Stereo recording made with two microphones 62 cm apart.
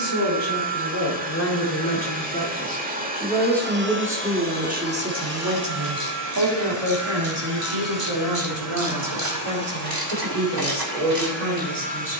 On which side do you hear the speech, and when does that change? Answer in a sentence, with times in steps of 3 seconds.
In this clip you hear the speech on the left from 0 s, in the centre from 3 s and on the right from 6 s.